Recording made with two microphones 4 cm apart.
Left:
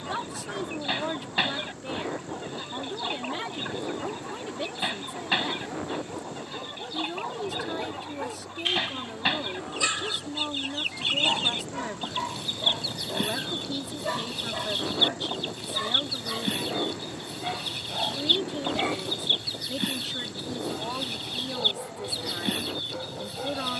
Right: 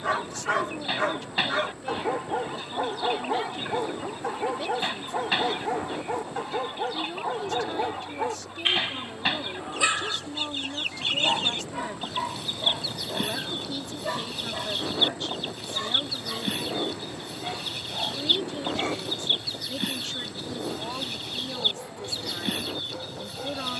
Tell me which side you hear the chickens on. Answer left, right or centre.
centre.